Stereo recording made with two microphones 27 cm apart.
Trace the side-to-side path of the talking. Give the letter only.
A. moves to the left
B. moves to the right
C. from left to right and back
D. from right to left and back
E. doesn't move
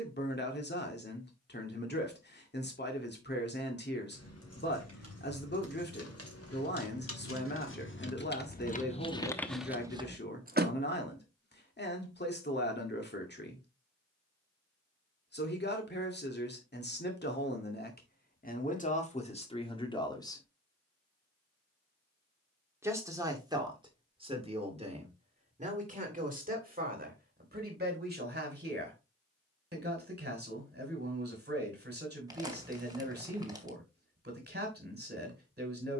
B.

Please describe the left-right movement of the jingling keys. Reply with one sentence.
You can hear the jingling keys go from the left side to the right.